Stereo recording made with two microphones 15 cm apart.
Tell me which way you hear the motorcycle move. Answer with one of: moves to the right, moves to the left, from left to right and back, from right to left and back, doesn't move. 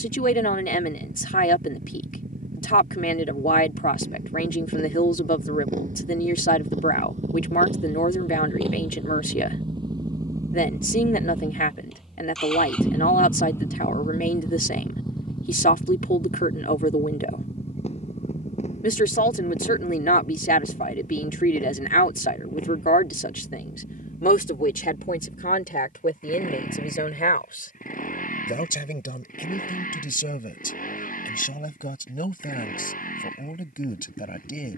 moves to the left.